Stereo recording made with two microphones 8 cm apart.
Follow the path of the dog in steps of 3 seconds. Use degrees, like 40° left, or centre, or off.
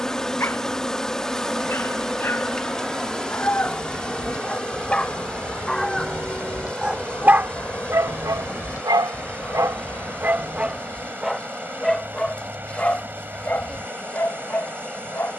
30° left, 20° left, 30° right, 20° right, 20° left.